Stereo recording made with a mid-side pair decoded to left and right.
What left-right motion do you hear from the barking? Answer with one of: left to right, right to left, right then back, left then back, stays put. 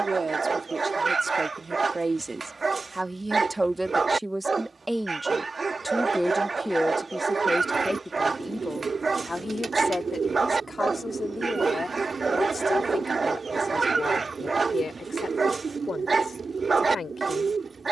stays put.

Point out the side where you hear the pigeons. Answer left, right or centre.
right.